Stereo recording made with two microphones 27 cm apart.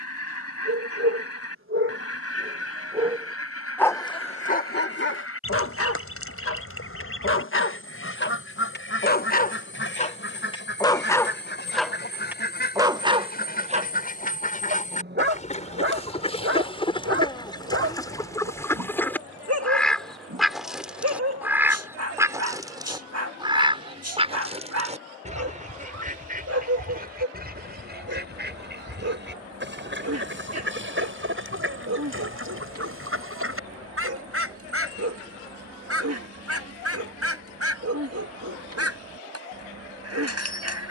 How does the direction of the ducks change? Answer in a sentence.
In this clip you hear the ducks travel towards the right.